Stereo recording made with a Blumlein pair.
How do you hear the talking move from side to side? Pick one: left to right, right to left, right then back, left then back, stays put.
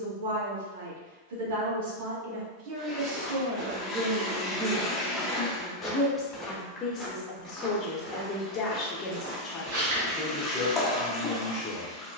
right to left.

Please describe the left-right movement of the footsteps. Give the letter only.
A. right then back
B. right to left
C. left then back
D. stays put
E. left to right
C.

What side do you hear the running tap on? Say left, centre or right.
centre.